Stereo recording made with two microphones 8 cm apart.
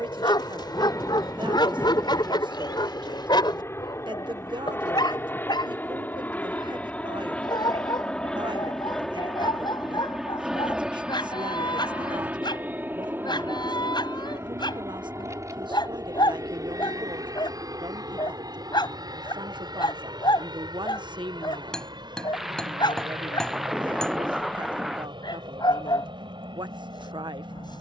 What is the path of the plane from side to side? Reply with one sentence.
You can hear the plane travel towards the right.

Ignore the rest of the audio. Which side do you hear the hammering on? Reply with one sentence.
You can hear the hammering in the centre.